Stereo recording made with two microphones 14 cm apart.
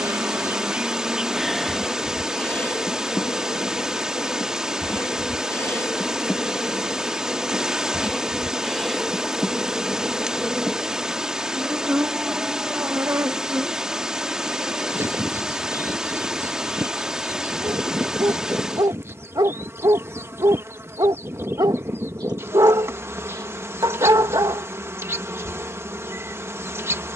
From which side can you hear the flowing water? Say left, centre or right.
centre.